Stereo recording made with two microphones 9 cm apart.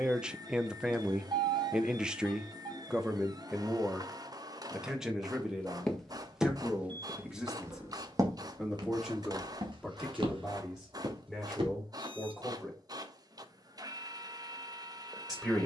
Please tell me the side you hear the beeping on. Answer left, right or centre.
right.